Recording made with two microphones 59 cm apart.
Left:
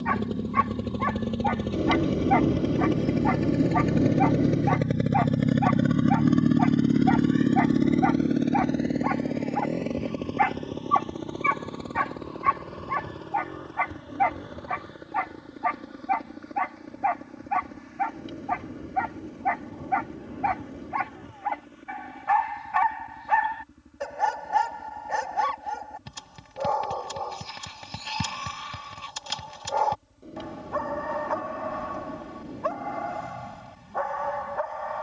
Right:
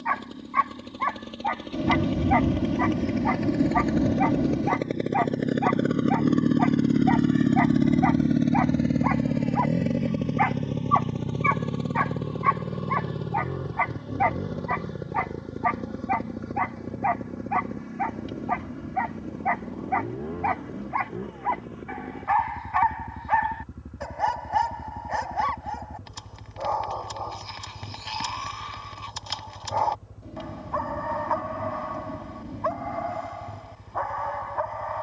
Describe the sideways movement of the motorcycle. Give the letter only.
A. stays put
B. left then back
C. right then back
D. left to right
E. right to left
D.